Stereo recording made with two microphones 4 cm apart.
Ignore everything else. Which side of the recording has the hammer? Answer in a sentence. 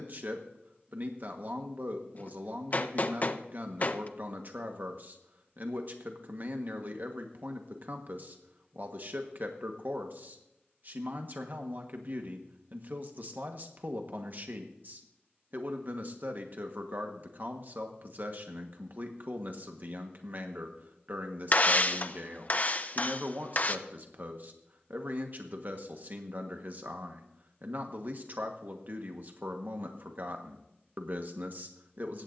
In this clip you hear the hammer on the left.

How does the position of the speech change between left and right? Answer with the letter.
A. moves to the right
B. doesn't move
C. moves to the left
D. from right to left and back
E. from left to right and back
B.